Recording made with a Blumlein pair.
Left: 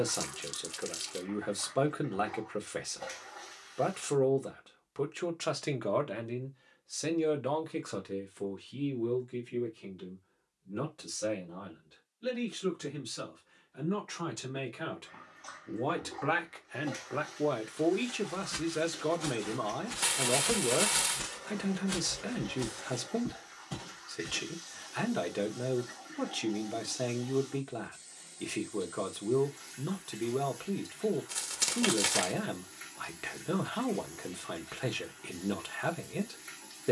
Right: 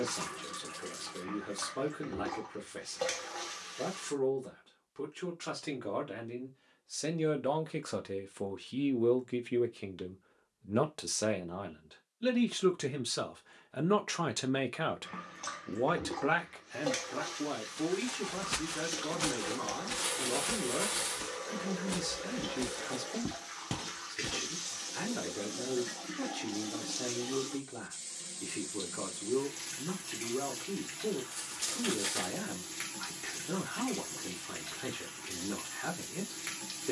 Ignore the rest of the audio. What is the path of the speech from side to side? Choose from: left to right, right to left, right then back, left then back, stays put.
right then back.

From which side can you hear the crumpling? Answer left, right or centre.
left.